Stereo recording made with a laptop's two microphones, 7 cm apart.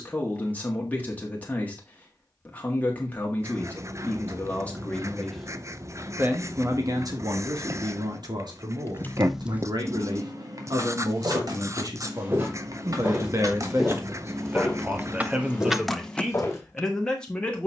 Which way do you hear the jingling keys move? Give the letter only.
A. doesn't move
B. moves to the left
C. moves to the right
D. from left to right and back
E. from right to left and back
D.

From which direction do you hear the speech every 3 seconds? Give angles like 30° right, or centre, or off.
20° left, 20° left, 60° right, 70° right, 40° right, centre.